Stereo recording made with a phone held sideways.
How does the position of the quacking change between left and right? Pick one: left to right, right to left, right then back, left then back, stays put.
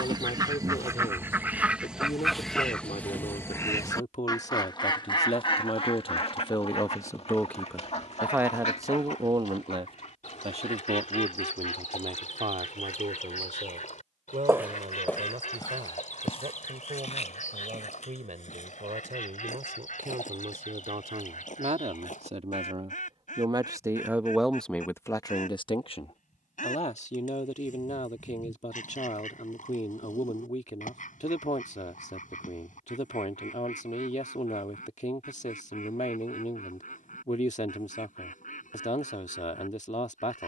right to left.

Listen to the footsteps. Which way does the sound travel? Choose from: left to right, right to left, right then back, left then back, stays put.
right to left.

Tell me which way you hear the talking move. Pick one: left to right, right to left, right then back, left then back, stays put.
right then back.